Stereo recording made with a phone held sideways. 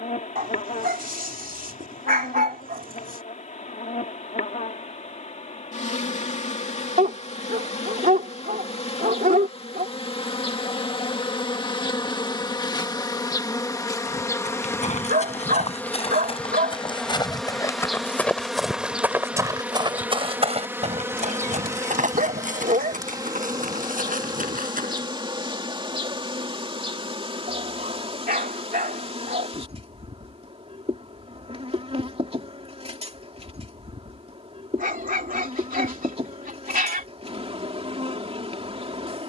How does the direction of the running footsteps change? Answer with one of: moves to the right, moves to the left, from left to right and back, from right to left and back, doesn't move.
moves to the right.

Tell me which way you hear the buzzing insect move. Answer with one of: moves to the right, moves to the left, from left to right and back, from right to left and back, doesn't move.
moves to the right.